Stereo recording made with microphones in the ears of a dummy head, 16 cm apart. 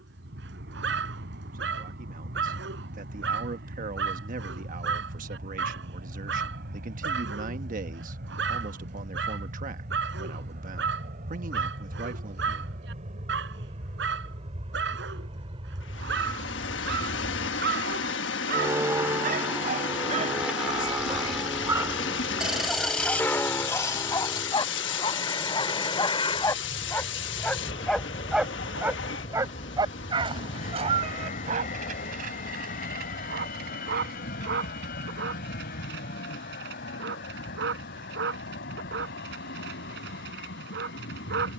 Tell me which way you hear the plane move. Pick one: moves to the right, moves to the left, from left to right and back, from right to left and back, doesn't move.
moves to the left.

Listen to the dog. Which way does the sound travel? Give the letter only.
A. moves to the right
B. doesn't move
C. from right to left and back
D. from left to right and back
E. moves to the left
C.